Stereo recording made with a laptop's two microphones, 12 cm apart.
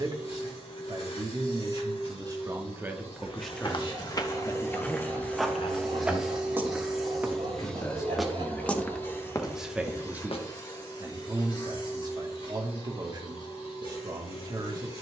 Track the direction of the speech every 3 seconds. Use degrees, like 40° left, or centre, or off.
40° right, 30° left, 30° left, 20° right, 40° right.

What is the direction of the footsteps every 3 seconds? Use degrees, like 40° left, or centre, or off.
off, 20° left, 10° right, 40° left, off.